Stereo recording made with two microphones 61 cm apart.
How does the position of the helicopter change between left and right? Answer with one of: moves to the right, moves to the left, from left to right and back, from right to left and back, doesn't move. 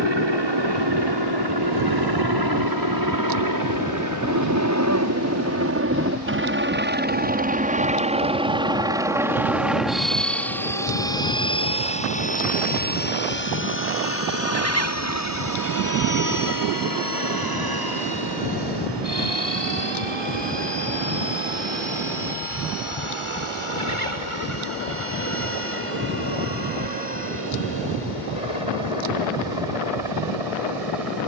moves to the left.